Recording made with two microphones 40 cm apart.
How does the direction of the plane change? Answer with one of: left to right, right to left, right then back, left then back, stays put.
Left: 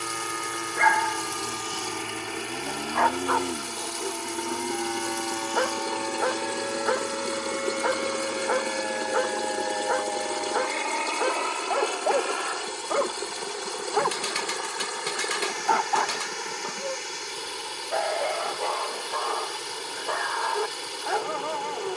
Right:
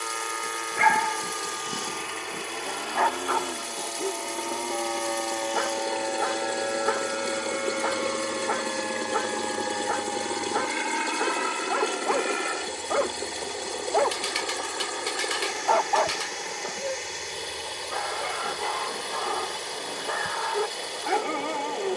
left to right.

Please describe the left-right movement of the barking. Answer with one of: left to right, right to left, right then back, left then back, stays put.
left then back.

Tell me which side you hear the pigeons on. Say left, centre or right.
left.